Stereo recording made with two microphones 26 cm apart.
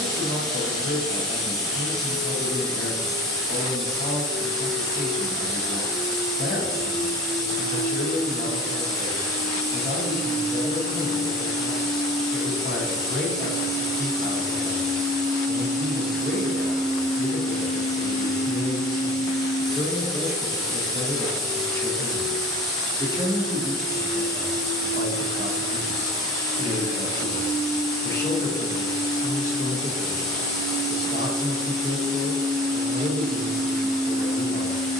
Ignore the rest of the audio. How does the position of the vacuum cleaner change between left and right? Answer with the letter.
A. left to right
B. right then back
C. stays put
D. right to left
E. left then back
C.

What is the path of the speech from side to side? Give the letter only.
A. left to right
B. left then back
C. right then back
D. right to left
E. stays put
C.